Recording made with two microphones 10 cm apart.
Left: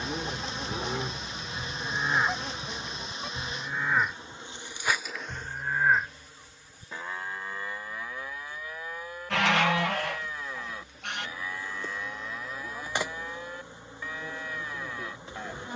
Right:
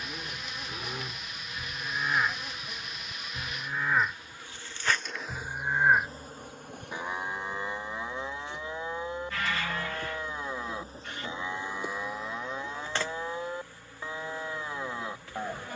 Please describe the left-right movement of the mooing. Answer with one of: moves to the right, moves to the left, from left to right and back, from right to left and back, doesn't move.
moves to the right.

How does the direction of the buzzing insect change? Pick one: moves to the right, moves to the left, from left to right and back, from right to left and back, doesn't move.
from left to right and back.